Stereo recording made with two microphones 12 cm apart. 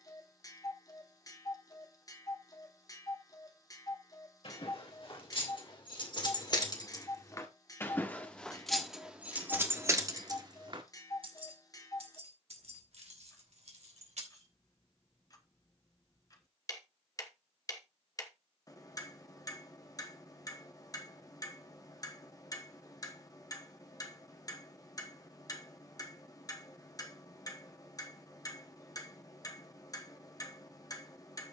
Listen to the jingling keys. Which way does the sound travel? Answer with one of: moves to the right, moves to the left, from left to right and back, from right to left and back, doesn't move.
moves to the right.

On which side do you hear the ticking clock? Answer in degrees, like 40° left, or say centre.
30° left.